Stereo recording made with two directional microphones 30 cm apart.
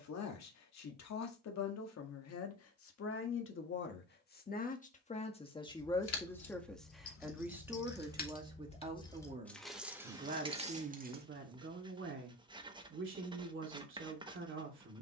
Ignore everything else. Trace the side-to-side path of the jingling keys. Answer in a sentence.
You can hear the jingling keys move to the right.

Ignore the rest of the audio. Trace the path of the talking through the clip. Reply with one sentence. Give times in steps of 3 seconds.
In this clip you hear the talking on the left from 0 s, in the centre from 6 s and on the right from 9 s.